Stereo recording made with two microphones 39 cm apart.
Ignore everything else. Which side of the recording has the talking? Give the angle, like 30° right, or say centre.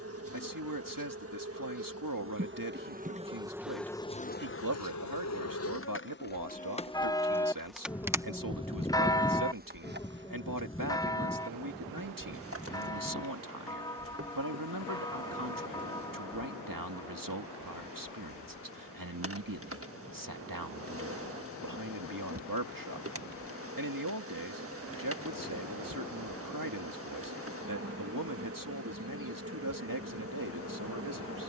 60° right.